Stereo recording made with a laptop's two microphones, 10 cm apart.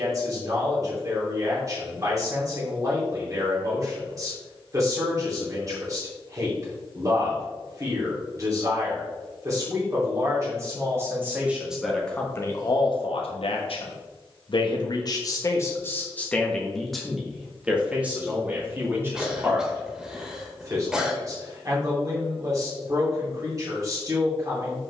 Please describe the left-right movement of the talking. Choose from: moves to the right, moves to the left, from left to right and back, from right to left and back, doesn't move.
from right to left and back.